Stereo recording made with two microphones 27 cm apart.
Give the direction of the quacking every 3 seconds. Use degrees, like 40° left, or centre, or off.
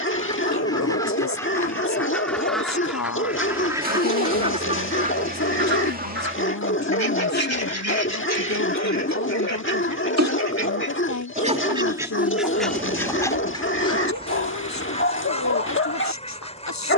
10° left, 20° right, 60° right, 50° right, 10° left, 20° left.